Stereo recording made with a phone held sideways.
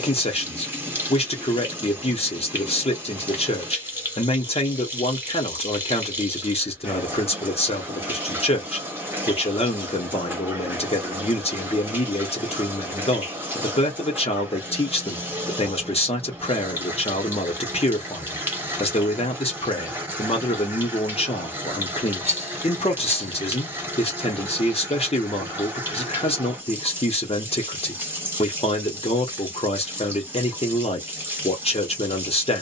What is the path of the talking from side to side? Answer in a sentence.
You can hear the talking stay in one place.